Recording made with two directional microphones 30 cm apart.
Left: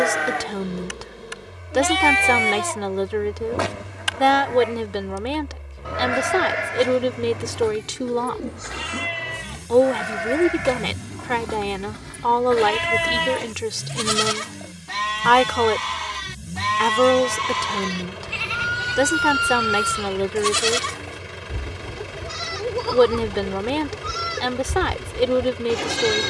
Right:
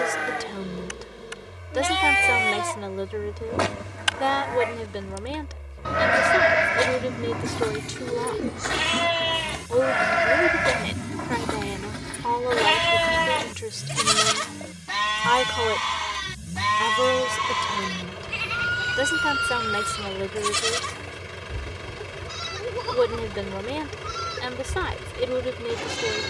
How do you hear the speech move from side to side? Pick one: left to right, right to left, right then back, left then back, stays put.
stays put.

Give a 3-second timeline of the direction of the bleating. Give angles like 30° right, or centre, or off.
20° left, 20° right, 50° right, 50° right, 30° right, centre, 20° left, 30° left, 30° left.